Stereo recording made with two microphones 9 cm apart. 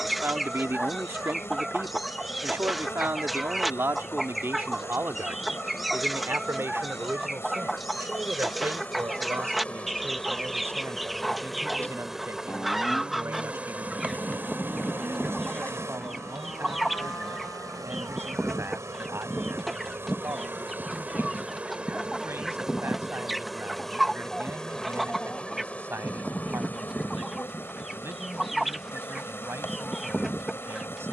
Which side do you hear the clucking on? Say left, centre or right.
centre.